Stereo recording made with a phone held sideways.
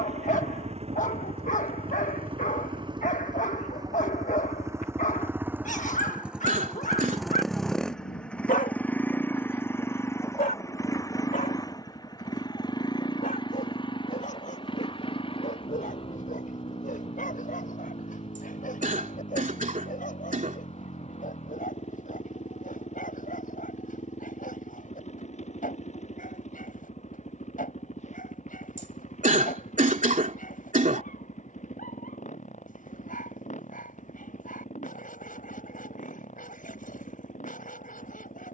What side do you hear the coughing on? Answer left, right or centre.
right.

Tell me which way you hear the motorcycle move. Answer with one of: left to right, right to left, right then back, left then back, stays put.
right to left.